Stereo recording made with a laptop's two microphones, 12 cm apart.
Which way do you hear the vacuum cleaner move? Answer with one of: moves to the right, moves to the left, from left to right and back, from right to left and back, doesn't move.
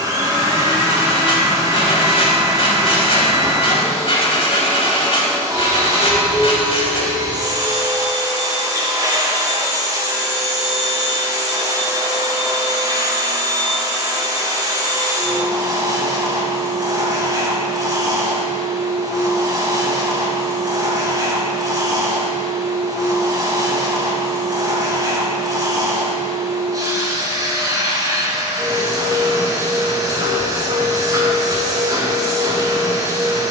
doesn't move.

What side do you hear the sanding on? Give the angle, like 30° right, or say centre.
50° left.